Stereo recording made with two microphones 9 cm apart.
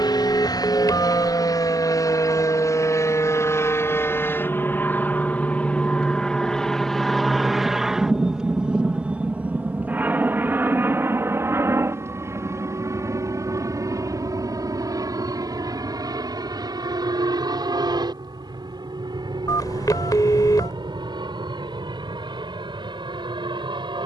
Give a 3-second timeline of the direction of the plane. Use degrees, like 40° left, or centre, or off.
50° left, 20° left, centre, 20° right, 40° right, 40° right, 50° right, 60° right.